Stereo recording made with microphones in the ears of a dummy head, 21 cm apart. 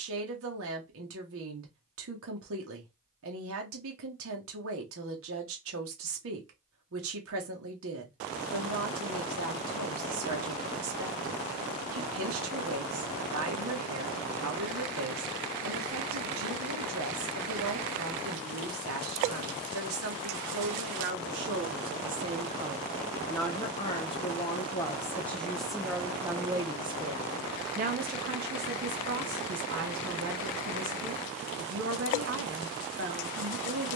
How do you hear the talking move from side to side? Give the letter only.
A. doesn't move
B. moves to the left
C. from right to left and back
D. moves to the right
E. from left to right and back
C.